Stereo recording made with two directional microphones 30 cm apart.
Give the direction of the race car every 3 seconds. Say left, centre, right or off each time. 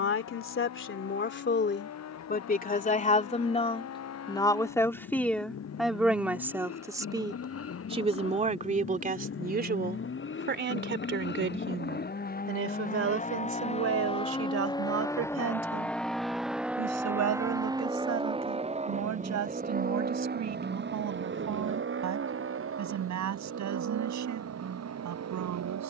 left, left, left, left, left, centre, right, right, right.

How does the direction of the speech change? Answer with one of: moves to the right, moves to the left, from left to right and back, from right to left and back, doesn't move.
moves to the right.